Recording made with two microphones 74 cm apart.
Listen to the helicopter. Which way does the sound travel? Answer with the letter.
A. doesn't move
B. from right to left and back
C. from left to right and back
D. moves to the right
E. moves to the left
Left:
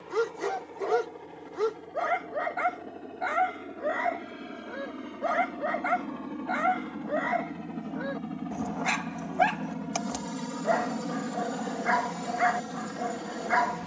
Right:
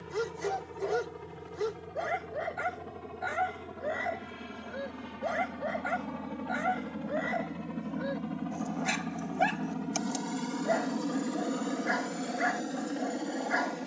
E.